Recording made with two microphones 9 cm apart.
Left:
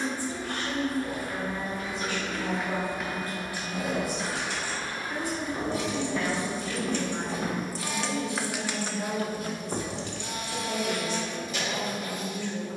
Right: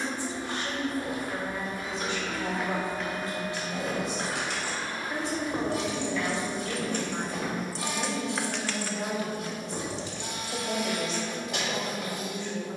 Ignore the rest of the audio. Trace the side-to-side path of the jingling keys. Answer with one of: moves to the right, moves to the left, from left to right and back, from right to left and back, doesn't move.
moves to the left.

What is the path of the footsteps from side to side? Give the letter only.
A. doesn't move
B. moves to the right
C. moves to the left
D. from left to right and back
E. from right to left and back
C.